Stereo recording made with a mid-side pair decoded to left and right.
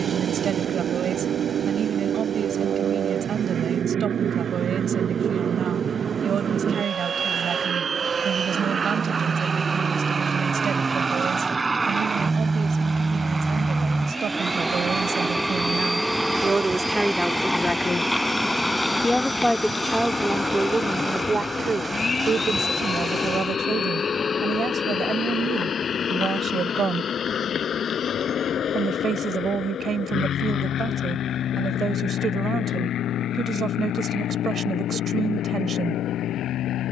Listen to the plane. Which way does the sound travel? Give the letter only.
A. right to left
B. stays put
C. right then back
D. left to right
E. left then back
A.